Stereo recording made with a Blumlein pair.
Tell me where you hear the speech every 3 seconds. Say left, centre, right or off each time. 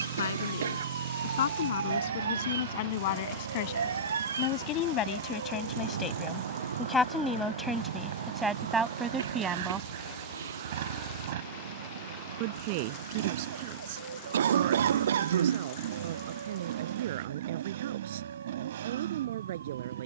left, left, centre, right, right, right, right.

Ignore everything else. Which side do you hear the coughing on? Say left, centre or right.
right.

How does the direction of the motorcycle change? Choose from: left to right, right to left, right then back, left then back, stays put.
stays put.